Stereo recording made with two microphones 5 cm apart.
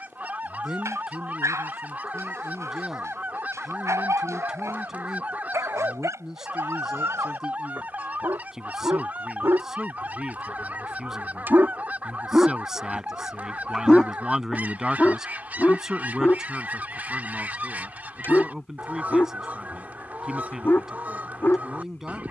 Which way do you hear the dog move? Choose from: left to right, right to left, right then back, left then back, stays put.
right to left.